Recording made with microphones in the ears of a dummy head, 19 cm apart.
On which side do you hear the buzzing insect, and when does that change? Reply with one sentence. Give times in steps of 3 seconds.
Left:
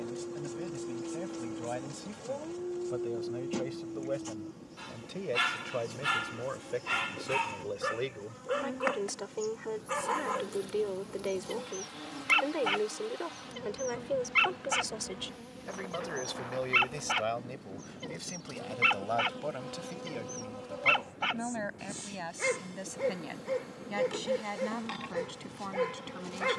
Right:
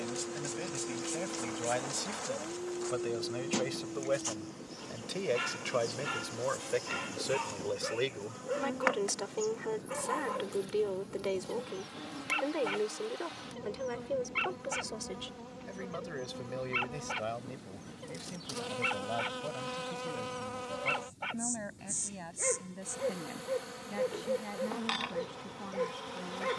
In this clip you hear the buzzing insect on the right from 0 s, in the centre from 9 s and on the right from 15 s.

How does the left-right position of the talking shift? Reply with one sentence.
In this clip you hear the talking move from right to left.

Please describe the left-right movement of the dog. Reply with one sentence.
You can hear the dog stay put.